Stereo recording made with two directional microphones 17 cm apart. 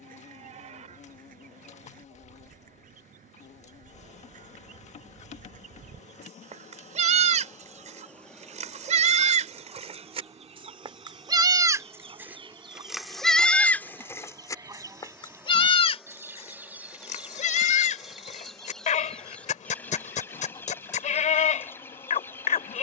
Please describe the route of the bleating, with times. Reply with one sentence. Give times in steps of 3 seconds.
You can hear the bleating on the right from 0 s, in the centre from 12 s and on the left from 15 s.